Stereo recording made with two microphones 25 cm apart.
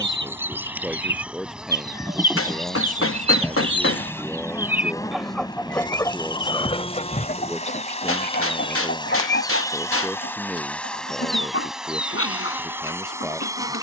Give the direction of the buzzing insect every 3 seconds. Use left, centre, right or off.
centre, centre, left, centre, centre.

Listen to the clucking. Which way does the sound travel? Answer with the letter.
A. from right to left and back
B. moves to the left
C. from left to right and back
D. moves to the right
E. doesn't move
B.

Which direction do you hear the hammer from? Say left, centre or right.
left.